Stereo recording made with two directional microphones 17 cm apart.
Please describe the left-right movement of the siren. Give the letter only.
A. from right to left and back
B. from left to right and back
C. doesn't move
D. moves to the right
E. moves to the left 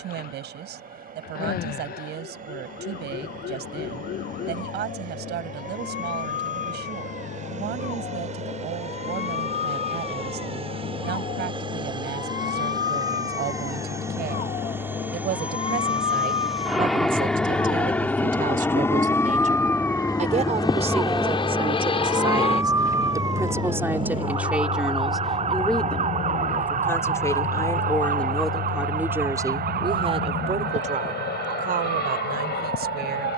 D.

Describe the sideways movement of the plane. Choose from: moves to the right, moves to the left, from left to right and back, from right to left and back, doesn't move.
moves to the left.